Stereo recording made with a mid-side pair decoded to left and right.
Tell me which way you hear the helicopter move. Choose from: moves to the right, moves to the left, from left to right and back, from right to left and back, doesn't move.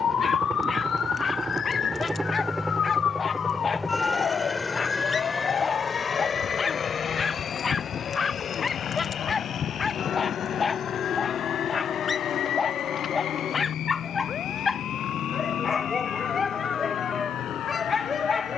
moves to the left.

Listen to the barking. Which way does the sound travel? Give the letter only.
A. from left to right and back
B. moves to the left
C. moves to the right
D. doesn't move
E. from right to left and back
D.